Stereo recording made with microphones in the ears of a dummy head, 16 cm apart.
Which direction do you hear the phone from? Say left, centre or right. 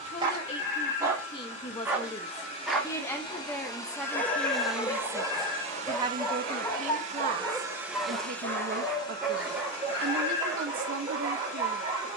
left.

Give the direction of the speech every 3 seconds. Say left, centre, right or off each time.
left, centre, right, right.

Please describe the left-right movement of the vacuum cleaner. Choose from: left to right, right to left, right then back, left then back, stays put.
right then back.